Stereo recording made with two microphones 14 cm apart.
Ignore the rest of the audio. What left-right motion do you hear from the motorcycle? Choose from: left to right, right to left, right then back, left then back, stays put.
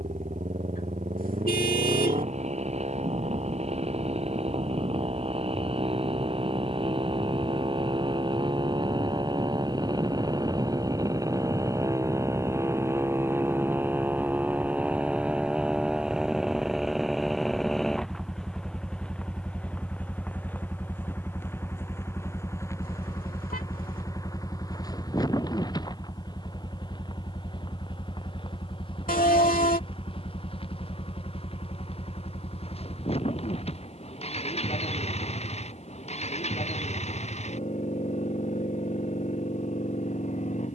right to left.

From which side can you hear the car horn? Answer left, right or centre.
left.